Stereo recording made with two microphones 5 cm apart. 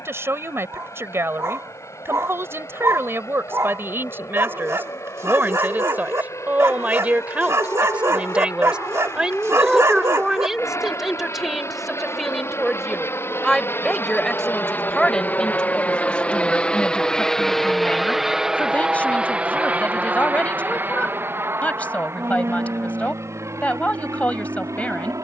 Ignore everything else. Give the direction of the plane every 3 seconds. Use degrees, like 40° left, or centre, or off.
80° left, 80° left, 70° left, 60° left, 50° left, 20° left, 20° right, 50° right, 60° right.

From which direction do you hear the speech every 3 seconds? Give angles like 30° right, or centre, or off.
50° right, 40° right, 30° right, 10° right, 10° left, 20° left, 30° left, 30° left, 30° left.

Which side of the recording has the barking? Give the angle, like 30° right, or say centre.
60° right.